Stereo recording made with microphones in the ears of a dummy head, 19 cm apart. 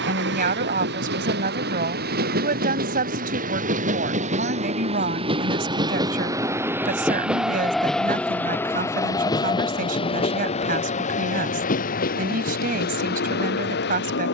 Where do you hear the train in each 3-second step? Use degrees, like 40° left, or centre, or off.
50° right, 30° right, centre, 30° left, 50° left.